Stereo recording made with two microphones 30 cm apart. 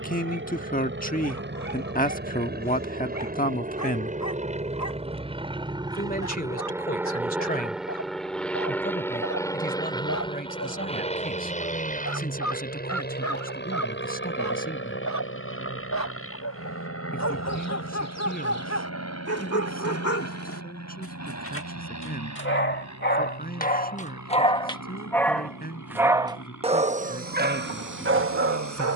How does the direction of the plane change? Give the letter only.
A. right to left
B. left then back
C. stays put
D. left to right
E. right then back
A.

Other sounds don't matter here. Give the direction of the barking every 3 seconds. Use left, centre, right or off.
left, left, left, left, left, left, left, left, centre, right.